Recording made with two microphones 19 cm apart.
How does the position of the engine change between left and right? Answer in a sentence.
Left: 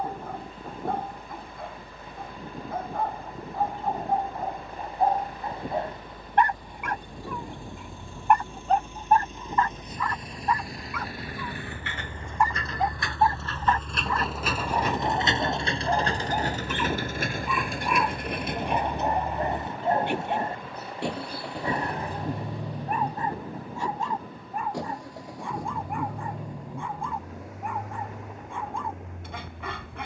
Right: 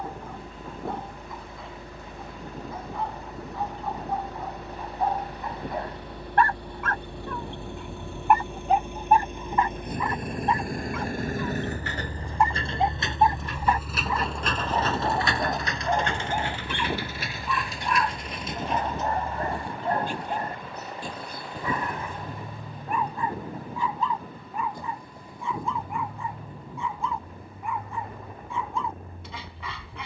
In this clip you hear the engine go from the right side to the left.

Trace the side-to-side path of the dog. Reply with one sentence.
In this clip you hear the dog go right and come back.